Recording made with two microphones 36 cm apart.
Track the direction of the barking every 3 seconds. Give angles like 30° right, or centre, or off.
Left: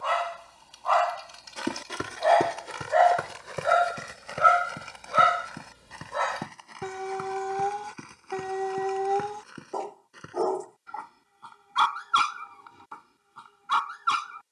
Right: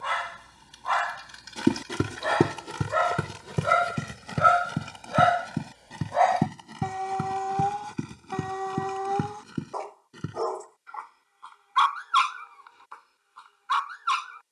30° right, centre, 30° left, 50° left, 60° left.